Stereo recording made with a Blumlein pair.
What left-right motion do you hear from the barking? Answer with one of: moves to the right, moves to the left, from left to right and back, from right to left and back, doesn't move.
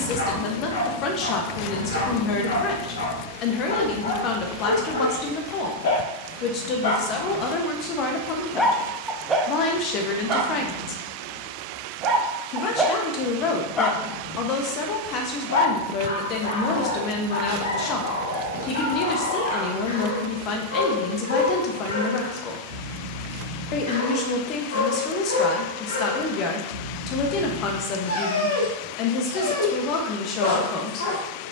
from left to right and back.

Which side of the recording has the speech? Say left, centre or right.
left.